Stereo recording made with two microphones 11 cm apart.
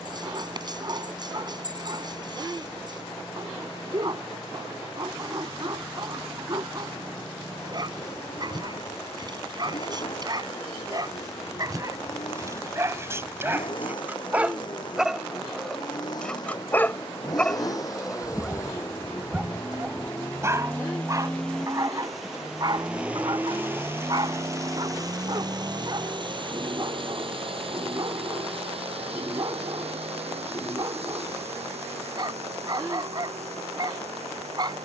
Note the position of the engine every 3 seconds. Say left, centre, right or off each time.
left, left, left, left, left, left, left, centre, right, right, right, right.